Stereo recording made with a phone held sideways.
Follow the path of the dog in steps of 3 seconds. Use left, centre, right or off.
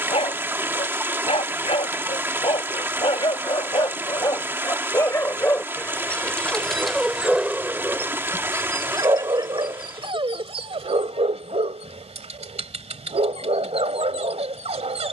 left, left, centre, right, right.